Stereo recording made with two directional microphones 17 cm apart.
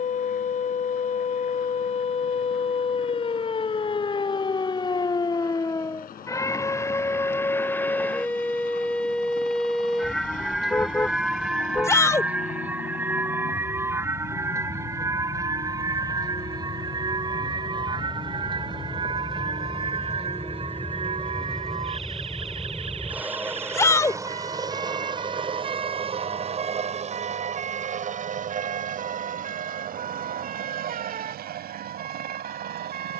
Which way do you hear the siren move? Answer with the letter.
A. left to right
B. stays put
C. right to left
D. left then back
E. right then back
A.